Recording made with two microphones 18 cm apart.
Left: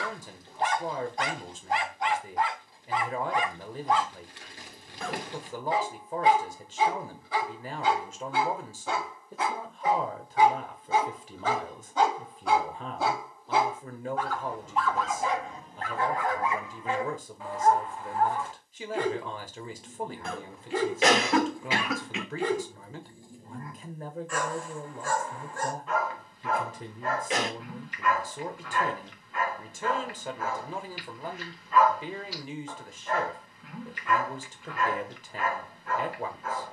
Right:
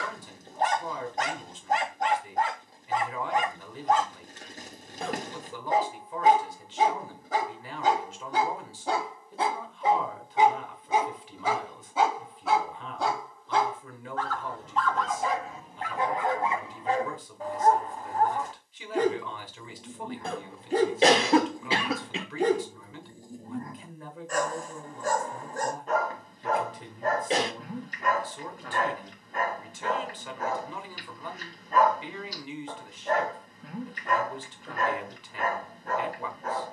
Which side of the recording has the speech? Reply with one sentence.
You can hear the speech on the left.